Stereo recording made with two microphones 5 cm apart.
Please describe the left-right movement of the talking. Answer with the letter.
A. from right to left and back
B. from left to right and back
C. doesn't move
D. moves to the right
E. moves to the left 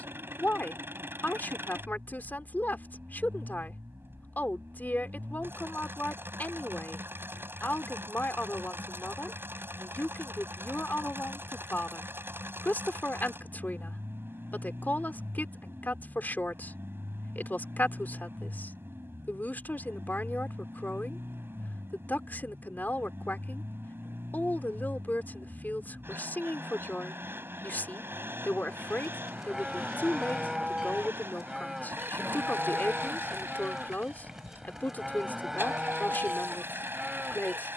C.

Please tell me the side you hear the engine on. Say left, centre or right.
right.